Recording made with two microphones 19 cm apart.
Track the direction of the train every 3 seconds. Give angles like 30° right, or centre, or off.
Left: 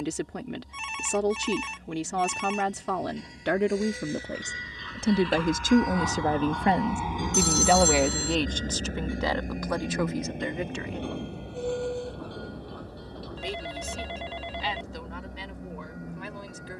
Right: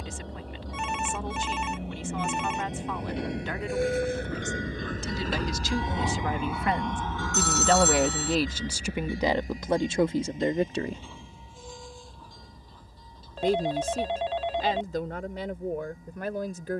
80° right, 50° right, 20° left, 60° left, 70° left, 70° left.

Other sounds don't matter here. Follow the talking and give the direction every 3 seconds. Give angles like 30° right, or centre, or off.
80° left, 60° left, 10° left, 30° right, 50° right, 50° right.